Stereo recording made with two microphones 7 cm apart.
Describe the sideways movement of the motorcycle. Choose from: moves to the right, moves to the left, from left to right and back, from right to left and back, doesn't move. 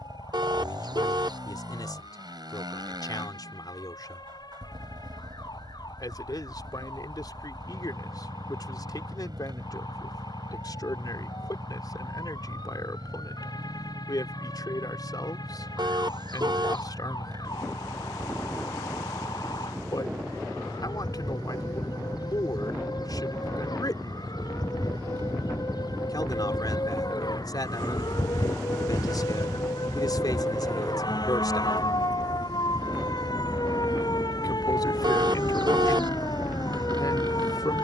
doesn't move.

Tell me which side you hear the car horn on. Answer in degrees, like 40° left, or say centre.
70° right.